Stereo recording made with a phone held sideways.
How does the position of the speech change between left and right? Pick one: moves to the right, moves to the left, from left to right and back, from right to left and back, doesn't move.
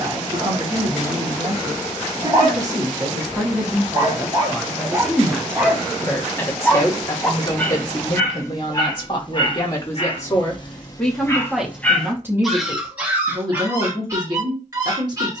from right to left and back.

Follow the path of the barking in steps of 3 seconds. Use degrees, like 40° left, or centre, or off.
30° right, 20° right, 20° left, 30° left, 10° right.